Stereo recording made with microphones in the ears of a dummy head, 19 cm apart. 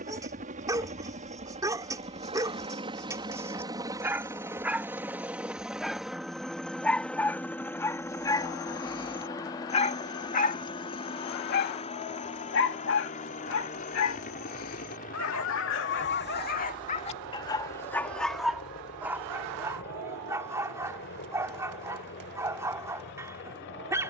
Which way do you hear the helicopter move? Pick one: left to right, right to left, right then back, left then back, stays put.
right to left.